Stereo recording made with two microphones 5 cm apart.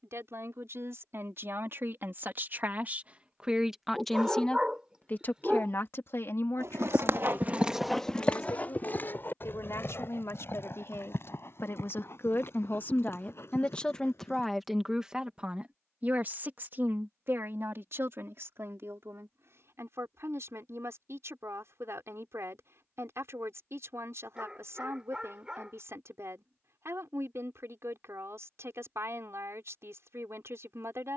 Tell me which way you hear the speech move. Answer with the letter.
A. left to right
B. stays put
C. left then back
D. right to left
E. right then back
C.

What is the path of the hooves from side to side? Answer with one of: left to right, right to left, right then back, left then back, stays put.
right to left.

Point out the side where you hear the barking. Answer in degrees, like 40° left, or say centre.
20° right.